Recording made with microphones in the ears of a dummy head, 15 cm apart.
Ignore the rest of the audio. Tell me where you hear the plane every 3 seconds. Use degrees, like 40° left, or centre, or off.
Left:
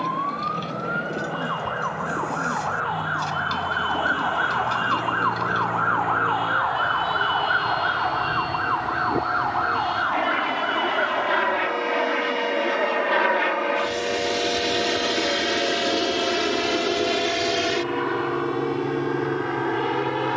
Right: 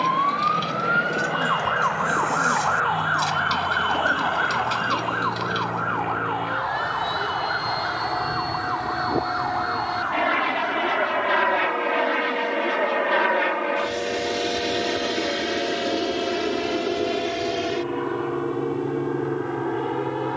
60° right, 50° right, 40° right, 20° right, 10° left, 30° left, 50° left.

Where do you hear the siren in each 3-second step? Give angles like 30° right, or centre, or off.
40° right, centre, 40° left, 60° left, 70° left, 80° left, 80° left.